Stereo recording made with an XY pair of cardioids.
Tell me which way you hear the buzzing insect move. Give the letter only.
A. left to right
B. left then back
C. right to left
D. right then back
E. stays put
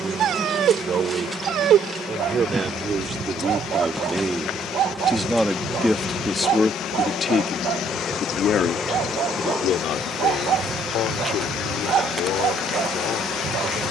B.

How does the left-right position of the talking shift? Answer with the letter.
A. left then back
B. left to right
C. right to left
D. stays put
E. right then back
C.